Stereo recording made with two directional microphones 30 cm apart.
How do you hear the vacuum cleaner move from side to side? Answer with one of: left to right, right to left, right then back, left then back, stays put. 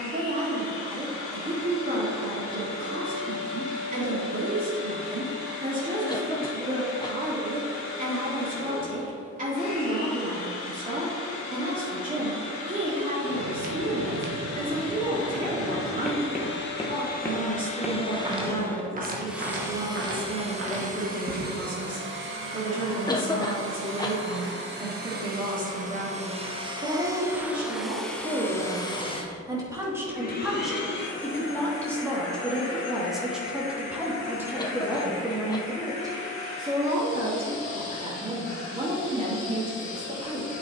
right then back.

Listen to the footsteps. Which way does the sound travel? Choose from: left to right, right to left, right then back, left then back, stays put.
left then back.